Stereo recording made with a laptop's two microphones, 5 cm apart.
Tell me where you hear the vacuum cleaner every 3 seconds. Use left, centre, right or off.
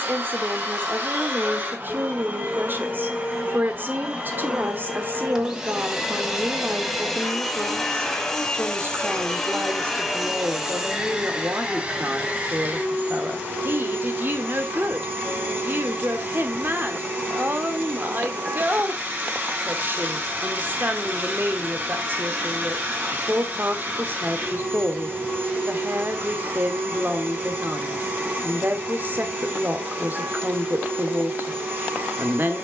right, right, centre, centre, right, right, right, right, right, right, right.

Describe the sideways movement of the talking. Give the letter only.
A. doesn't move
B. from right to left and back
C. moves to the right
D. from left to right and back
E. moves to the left
A.